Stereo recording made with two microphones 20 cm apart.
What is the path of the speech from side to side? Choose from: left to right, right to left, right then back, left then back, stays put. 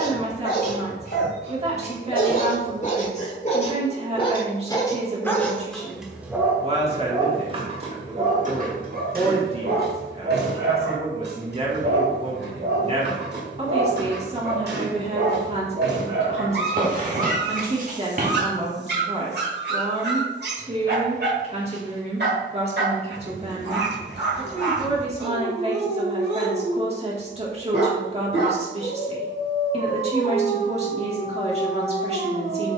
stays put.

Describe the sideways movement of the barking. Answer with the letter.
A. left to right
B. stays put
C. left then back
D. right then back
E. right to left
A.